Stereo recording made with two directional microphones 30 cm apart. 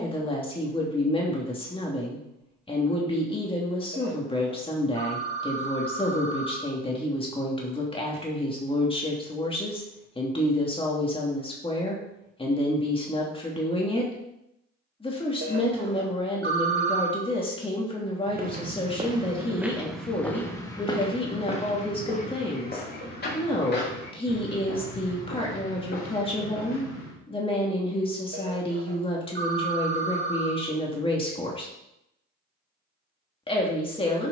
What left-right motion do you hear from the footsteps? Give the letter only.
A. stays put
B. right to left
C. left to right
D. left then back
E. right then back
B.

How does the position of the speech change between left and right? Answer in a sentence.
You can hear the speech stay in one place.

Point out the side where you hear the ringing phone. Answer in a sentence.
You can hear the ringing phone on the right.